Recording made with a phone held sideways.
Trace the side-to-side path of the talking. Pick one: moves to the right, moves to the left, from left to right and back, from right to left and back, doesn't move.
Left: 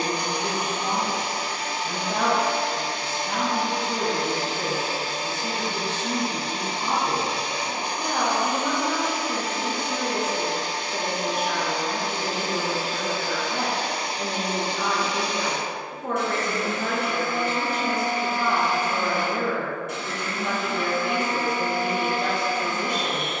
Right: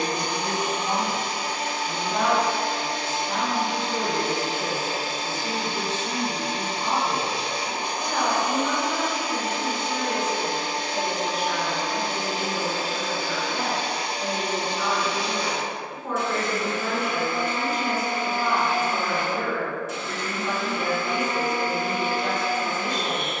doesn't move.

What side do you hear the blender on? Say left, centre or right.
left.